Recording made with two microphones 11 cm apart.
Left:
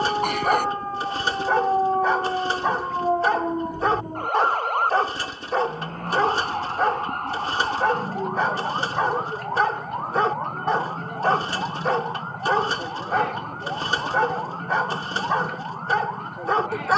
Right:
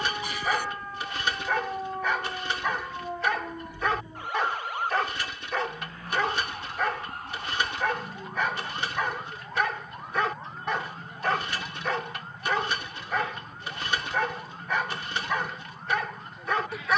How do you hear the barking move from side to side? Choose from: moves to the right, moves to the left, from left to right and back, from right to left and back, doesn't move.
doesn't move.